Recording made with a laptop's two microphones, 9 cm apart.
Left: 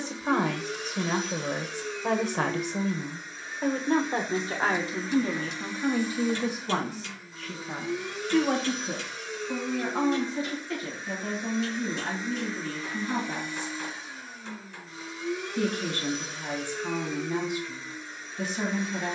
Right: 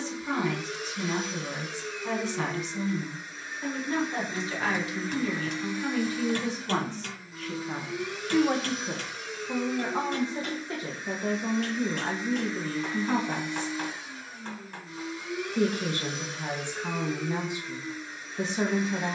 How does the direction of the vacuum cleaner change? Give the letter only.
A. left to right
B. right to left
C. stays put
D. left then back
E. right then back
C.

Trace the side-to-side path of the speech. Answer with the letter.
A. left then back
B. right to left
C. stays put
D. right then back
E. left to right
E.